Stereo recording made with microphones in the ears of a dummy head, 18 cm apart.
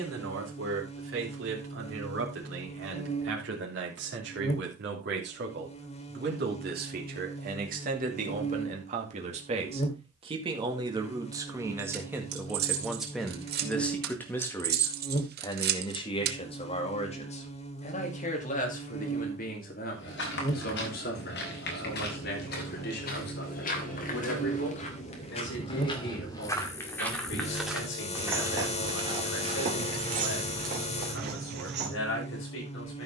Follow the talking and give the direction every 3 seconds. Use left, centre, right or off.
right, right, right, right, centre, left, left, left, left, left, left.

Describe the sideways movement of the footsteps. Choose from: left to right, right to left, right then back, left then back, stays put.
left to right.